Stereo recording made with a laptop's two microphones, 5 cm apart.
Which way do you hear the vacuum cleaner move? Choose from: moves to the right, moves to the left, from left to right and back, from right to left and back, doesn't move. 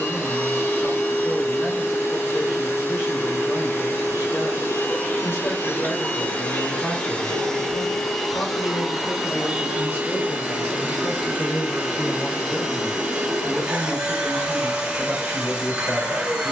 moves to the right.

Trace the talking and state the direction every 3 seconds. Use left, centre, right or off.
left, left, left, left, centre, right.